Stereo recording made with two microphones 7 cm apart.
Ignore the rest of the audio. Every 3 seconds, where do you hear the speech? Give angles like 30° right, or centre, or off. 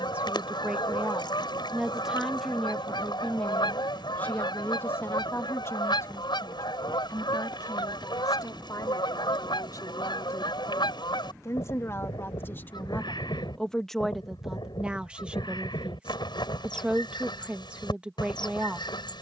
10° right, 20° left, 50° left, 50° left, 10° left, 10° right, 10° right.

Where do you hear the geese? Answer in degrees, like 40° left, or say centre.
80° left.